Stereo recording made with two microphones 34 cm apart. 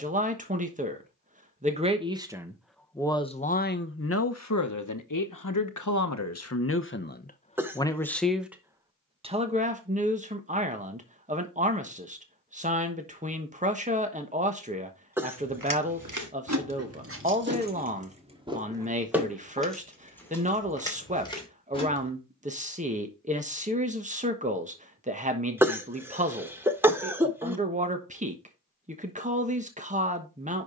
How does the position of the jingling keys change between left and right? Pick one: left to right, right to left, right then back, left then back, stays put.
right to left.